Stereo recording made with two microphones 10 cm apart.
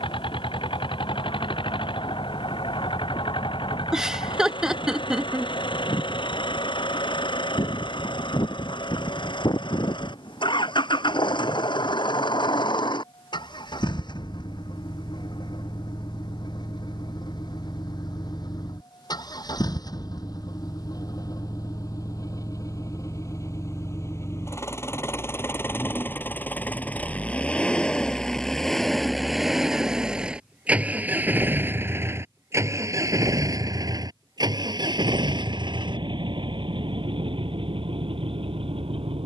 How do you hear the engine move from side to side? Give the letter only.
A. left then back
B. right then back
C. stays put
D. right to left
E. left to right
E.